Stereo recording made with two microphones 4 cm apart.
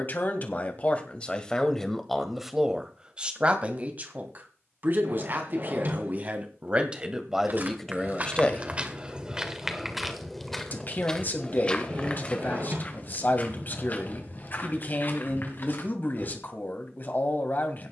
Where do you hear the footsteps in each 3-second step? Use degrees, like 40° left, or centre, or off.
off, off, 40° right, centre, 40° left, 50° left.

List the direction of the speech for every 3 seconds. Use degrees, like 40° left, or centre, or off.
20° left, 40° right, 10° right, 50° left, 50° left, 50° left.